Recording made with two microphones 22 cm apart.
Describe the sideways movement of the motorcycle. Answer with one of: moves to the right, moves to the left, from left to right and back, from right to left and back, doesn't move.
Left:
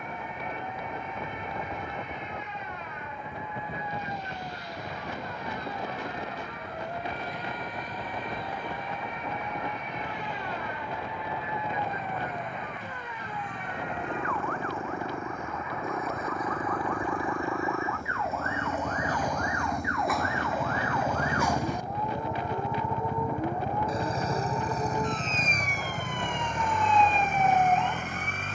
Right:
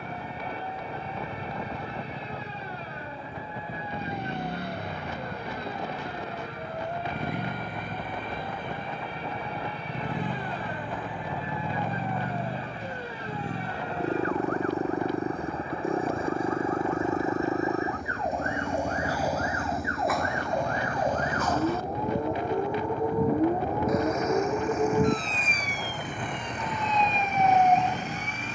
moves to the left.